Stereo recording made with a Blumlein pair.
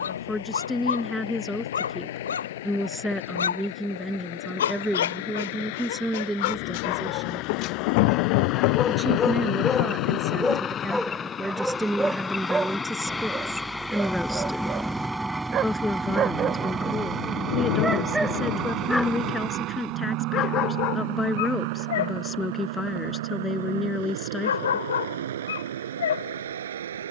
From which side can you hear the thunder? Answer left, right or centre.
left.